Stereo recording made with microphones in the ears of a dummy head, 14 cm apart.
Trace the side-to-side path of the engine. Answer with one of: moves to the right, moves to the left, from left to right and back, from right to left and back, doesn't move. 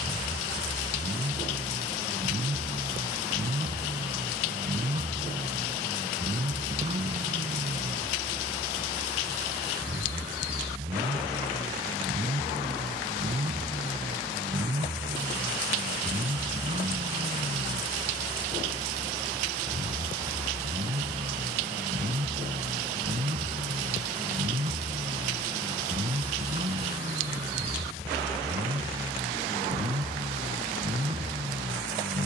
doesn't move.